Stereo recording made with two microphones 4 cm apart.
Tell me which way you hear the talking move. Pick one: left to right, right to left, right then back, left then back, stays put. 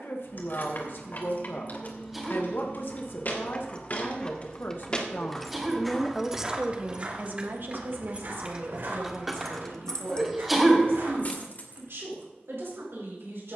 left to right.